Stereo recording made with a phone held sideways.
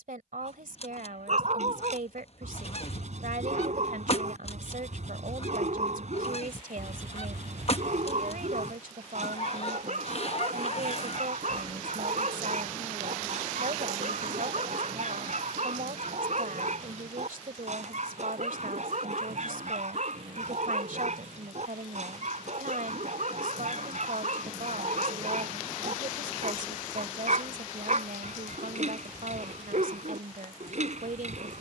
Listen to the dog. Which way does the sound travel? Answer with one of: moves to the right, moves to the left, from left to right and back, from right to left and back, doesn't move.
doesn't move.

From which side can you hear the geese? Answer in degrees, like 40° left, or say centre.
50° left.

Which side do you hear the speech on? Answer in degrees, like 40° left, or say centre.
70° right.